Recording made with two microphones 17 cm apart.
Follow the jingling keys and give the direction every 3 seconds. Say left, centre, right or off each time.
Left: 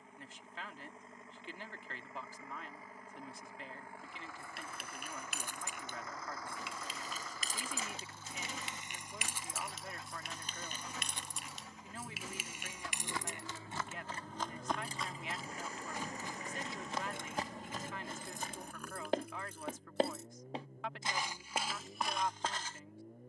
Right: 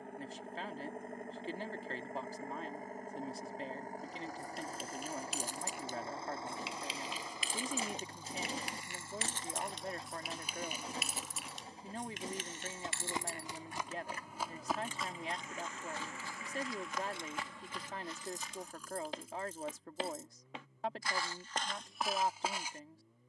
off, left, left, centre, left, left, left, off.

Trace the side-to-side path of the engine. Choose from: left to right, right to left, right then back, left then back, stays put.
right to left.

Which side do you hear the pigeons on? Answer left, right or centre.
right.